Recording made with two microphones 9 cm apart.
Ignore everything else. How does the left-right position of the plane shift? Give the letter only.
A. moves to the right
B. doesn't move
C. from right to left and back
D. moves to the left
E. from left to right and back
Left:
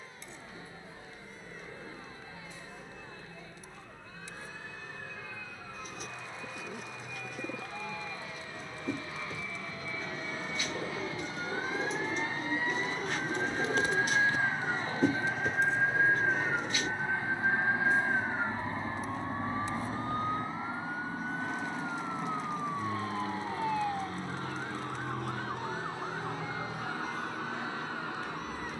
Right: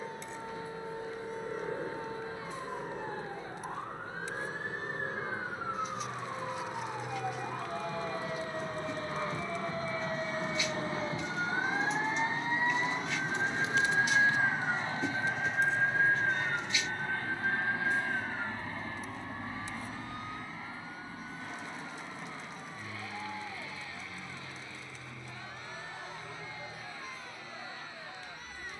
D.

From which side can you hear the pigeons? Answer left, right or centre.
left.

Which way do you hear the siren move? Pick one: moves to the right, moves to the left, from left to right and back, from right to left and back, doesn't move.
moves to the left.